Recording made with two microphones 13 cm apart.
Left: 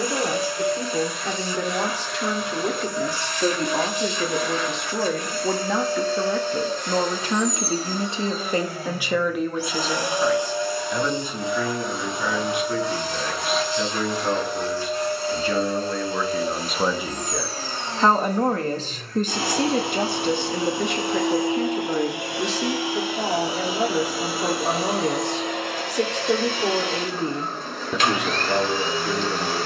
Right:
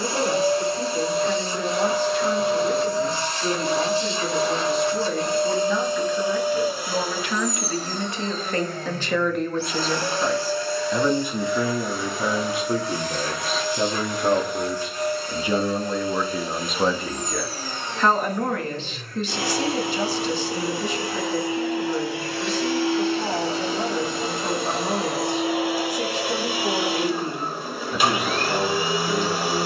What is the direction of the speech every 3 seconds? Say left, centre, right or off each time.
left, left, left, centre, right, centre, left, left, left, left.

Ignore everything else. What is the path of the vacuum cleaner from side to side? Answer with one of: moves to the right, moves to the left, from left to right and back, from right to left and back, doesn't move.
from right to left and back.